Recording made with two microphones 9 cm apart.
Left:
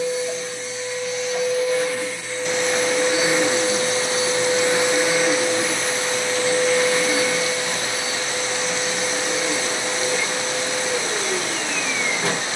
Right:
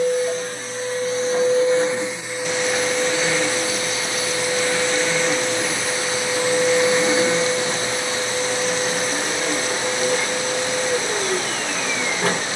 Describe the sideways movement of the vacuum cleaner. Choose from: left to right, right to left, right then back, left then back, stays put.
left then back.